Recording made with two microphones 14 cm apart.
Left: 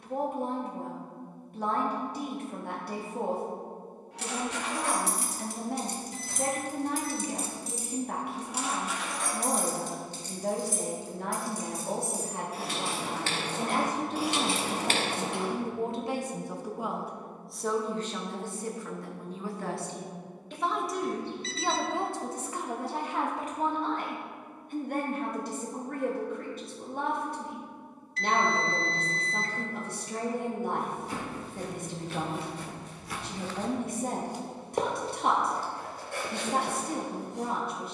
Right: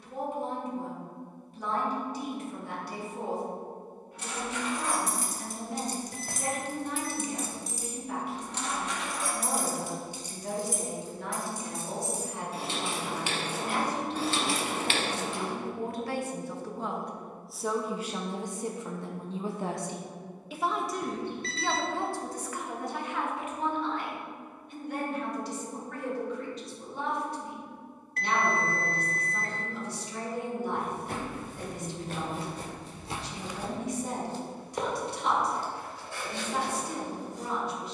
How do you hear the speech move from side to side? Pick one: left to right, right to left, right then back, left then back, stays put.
right then back.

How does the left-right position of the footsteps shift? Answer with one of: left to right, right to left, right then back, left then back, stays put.
right to left.